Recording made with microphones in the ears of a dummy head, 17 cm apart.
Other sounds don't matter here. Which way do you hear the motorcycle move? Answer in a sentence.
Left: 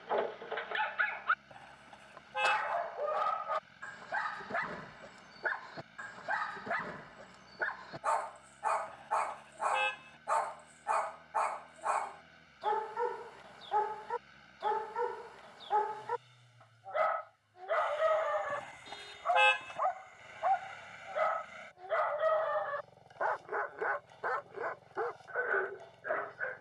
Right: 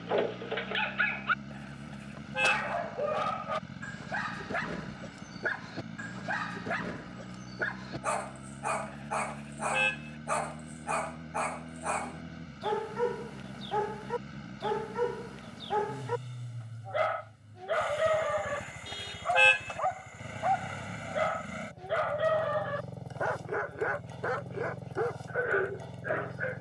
In this clip you hear the motorcycle stay put.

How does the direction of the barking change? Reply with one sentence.
In this clip you hear the barking stay put.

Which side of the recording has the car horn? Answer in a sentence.
In this clip you hear the car horn on the right.